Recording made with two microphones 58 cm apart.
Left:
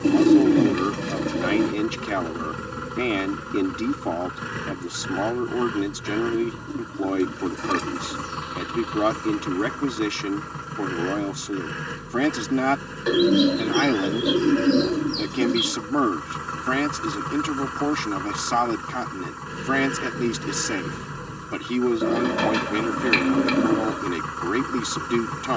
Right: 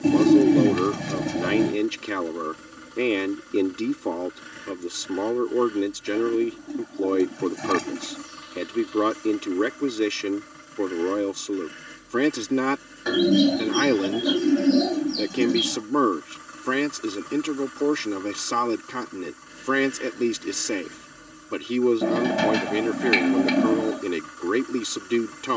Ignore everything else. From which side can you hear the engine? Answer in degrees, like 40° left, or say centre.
80° left.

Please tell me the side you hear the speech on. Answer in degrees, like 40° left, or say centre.
10° left.